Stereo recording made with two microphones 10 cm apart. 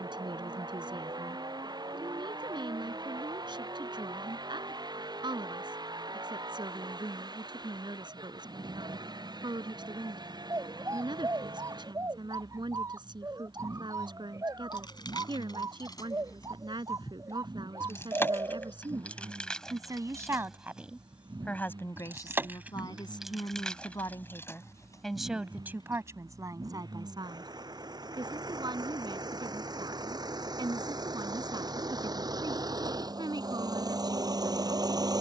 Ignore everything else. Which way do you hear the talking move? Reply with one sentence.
You can hear the talking move from right to left and back again.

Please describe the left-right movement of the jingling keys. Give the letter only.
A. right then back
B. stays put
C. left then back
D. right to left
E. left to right
A.